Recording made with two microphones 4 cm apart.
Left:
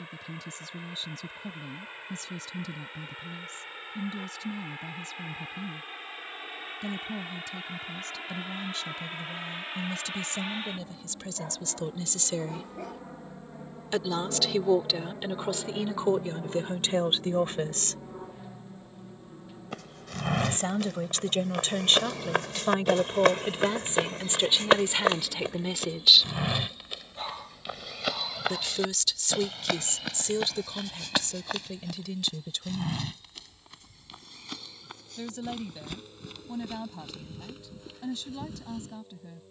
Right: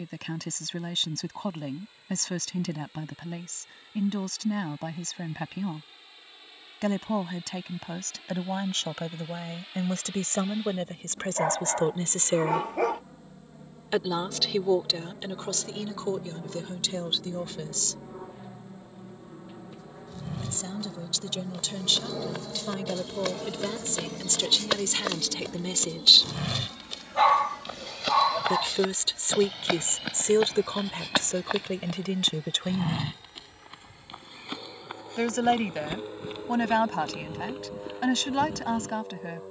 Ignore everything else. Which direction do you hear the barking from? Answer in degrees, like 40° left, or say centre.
80° right.